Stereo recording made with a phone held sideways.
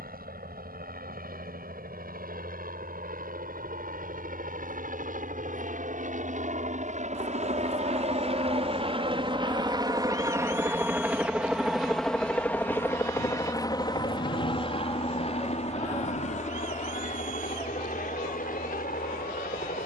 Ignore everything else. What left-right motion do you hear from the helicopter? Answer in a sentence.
In this clip you hear the helicopter move to the left.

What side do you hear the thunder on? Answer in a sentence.
In this clip you hear the thunder on the left.